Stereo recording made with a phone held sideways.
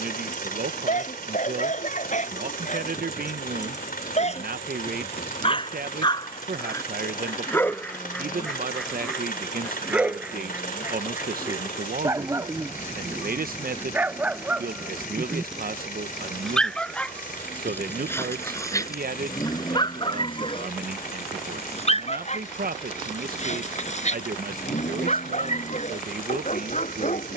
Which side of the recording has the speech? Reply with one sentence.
In this clip you hear the speech on the right.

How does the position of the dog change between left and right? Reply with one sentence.
In this clip you hear the dog move from left to right and back again.